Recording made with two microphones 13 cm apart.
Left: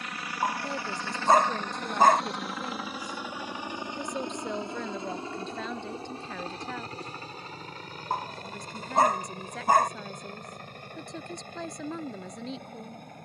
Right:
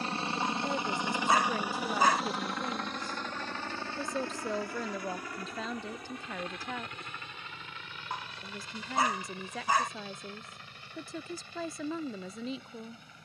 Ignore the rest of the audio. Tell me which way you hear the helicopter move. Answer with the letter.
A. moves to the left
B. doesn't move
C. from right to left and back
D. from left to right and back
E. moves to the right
A.